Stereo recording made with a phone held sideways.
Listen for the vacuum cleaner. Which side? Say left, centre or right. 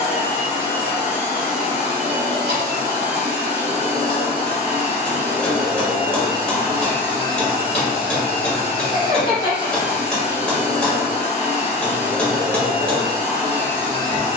left.